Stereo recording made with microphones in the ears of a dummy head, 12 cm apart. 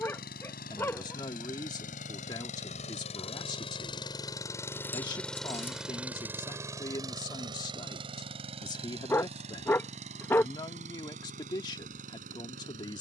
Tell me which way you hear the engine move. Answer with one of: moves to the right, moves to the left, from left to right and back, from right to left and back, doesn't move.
moves to the right.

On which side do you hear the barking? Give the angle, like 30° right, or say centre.
10° left.